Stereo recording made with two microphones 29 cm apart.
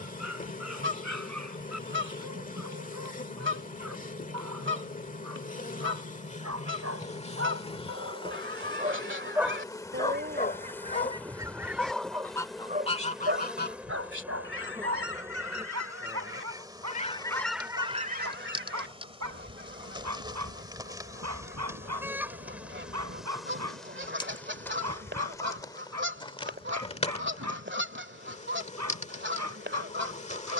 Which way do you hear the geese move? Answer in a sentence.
In this clip you hear the geese move from right to left and back again.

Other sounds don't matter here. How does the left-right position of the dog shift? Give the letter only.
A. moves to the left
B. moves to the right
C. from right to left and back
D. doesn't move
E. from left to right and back
C.